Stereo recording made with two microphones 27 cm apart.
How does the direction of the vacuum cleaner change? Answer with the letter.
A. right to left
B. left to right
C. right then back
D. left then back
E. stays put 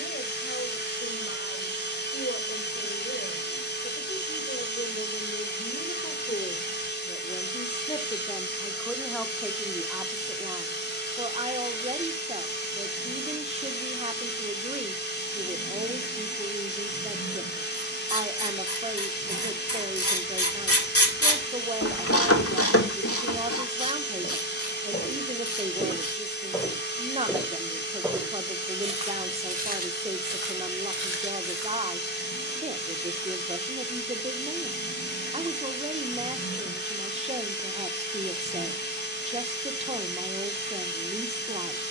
E.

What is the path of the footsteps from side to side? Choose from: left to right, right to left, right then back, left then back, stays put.
left to right.